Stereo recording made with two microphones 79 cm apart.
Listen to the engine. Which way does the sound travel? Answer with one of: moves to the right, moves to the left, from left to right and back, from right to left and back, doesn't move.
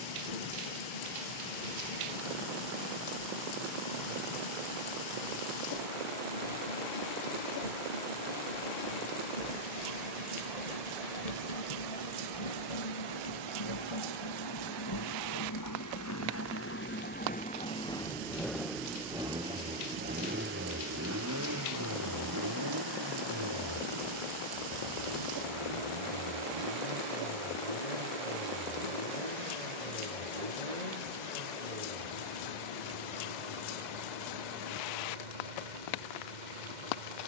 moves to the right.